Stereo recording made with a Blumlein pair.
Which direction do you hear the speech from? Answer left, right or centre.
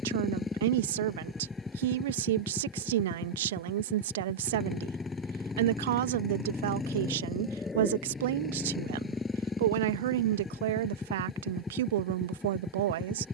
right.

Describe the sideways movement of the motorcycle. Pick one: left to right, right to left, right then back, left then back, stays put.
stays put.